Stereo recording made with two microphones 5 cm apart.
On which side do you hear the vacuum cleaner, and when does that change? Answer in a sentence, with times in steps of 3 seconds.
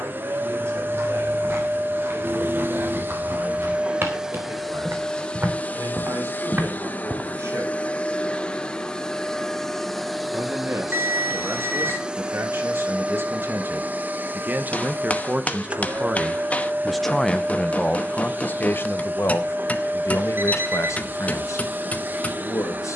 You can hear the vacuum cleaner on the right from 0 s, in the centre from 3 s, on the left from 6 s, in the centre from 9 s and on the right from 12 s.